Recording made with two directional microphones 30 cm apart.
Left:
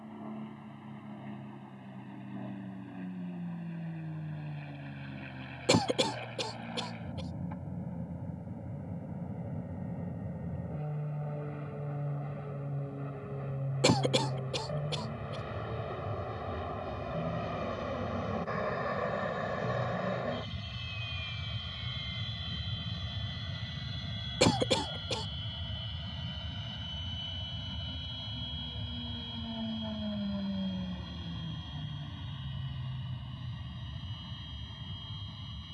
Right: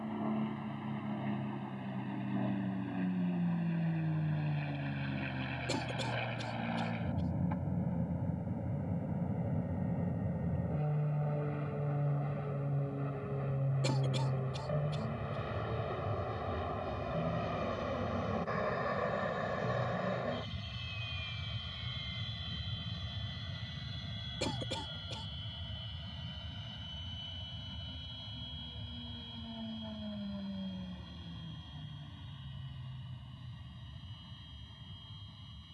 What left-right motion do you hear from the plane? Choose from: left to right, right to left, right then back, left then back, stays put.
right to left.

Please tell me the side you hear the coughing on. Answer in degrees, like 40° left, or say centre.
60° left.